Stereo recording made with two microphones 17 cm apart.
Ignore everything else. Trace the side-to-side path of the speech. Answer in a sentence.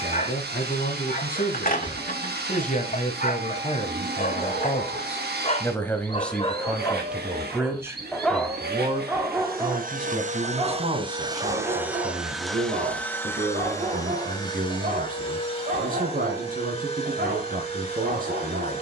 In this clip you hear the speech move from left to right.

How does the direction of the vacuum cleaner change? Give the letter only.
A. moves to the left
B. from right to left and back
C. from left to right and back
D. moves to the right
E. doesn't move
A.